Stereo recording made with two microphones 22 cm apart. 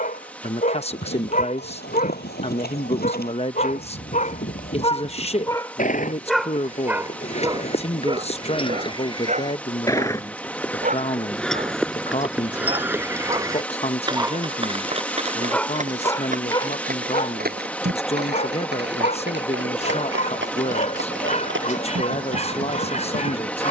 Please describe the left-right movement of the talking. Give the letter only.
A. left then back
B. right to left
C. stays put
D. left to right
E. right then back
C.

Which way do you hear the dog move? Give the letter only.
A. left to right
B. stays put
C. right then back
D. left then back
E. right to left
C.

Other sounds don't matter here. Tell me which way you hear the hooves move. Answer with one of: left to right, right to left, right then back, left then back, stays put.
left to right.